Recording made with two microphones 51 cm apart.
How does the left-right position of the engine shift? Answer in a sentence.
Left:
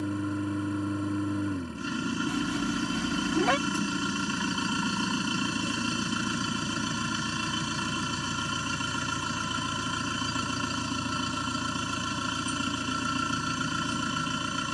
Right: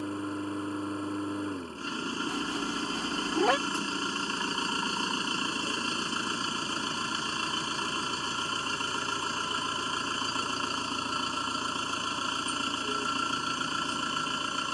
In this clip you hear the engine stay in one place.